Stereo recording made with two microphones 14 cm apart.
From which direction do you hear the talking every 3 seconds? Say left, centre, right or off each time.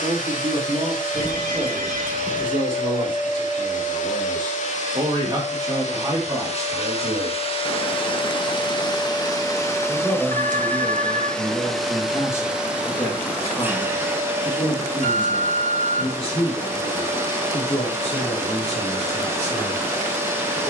right, right, right, centre, left, left, left.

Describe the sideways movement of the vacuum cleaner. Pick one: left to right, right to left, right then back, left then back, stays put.
left to right.